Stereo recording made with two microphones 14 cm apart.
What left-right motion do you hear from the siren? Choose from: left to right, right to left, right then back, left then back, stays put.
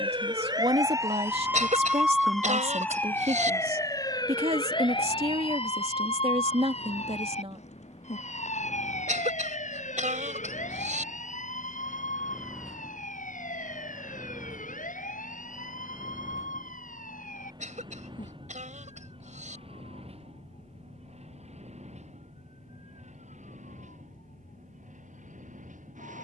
right to left.